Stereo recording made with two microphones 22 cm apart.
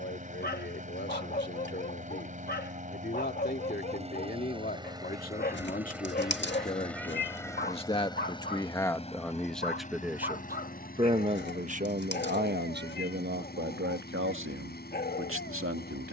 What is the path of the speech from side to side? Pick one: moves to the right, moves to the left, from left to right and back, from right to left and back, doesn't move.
moves to the right.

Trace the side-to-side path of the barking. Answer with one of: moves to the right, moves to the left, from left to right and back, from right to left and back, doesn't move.
doesn't move.